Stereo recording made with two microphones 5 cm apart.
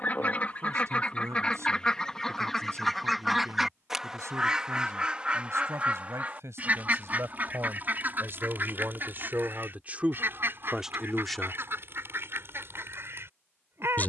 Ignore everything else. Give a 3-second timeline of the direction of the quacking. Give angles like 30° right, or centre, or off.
20° left, 20° right, 40° right, 50° right, 60° right.